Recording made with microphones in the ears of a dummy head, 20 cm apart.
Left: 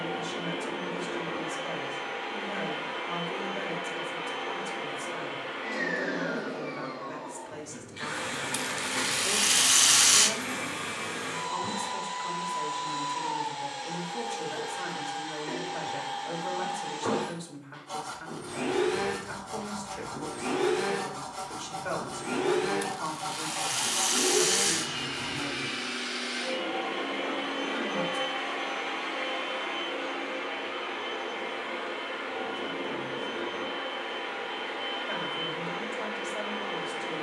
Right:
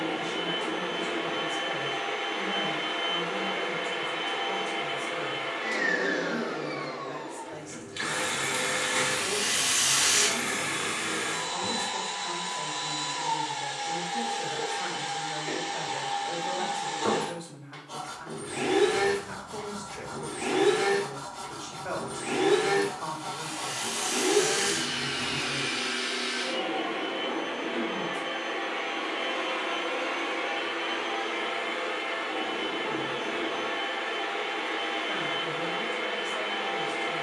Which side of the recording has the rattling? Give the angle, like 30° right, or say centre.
30° left.